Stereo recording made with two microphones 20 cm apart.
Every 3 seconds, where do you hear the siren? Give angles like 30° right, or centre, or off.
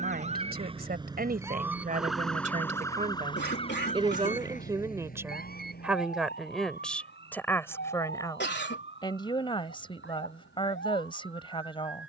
10° right, 40° left, 60° left, 70° left.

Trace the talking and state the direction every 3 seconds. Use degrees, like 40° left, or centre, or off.
50° right, 20° right, 10° left, 30° left.